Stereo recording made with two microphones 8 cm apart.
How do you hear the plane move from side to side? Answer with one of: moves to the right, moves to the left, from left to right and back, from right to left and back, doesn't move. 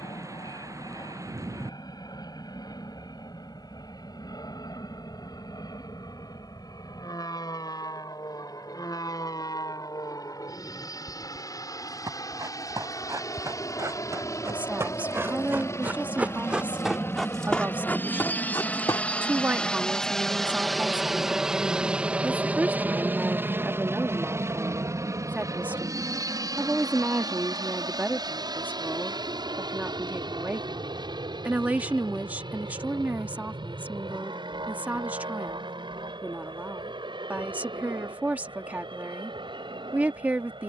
moves to the right.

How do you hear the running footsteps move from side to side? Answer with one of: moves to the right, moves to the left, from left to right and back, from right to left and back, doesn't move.
moves to the left.